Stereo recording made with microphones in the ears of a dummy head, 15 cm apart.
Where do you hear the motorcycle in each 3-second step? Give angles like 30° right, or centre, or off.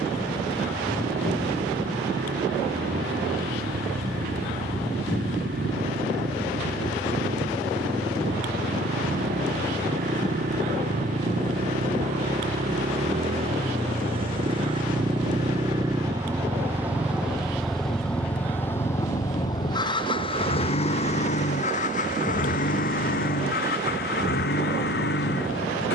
70° right, 70° right, 60° right, 50° right, 40° right, 10° right, 20° left, 50° left, 60° left.